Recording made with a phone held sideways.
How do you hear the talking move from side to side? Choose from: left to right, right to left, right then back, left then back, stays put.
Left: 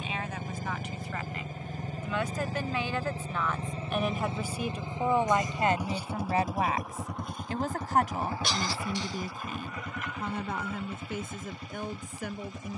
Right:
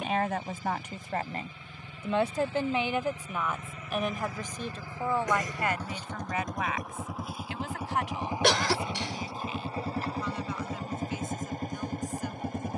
right to left.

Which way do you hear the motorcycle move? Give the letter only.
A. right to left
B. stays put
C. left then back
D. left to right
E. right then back
D.